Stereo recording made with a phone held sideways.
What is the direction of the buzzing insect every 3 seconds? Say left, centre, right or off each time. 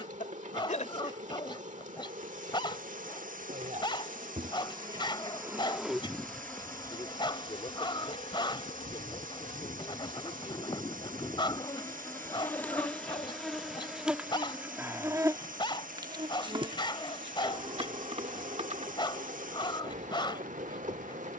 right, right, left, left, centre, right, right.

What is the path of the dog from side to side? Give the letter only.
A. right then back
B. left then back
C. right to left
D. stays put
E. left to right
D.